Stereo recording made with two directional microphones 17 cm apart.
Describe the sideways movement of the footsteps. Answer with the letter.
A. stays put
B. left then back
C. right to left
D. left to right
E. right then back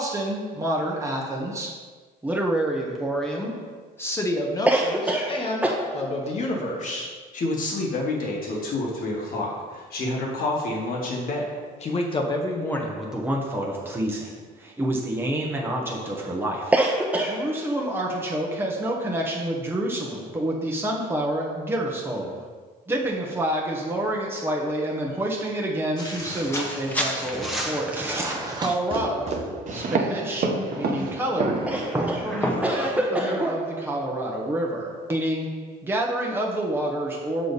E.